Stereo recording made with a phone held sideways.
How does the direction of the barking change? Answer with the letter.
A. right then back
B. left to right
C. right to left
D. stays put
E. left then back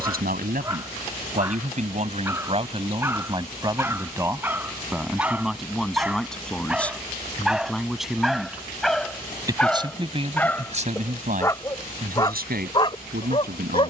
C.